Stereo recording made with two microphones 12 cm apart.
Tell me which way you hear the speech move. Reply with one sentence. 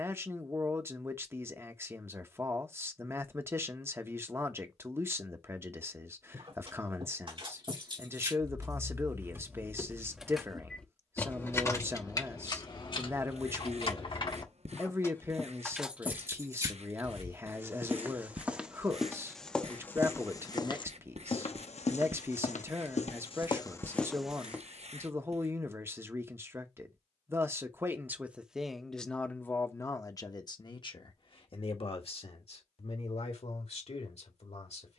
You can hear the speech travel towards the left.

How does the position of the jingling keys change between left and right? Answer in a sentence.
You can hear the jingling keys move from right to left and back again.